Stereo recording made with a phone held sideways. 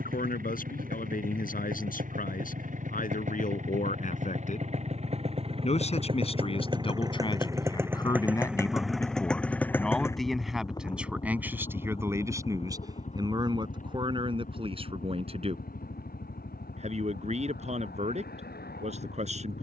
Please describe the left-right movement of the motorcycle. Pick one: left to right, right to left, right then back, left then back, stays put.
right to left.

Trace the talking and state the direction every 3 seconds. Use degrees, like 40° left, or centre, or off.
60° left, 50° left, 30° left, centre, 30° right, 40° right, 40° right.